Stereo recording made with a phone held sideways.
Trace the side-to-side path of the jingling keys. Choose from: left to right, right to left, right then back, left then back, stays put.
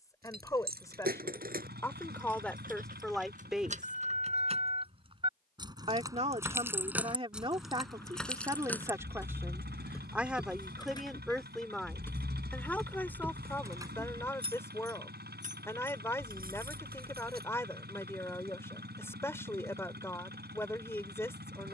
left then back.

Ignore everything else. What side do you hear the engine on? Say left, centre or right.
right.